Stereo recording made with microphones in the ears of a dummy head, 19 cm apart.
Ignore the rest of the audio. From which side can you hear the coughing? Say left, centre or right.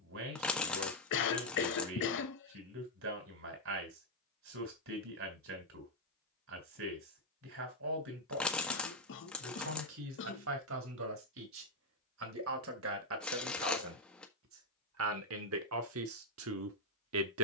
left.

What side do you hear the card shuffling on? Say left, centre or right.
centre.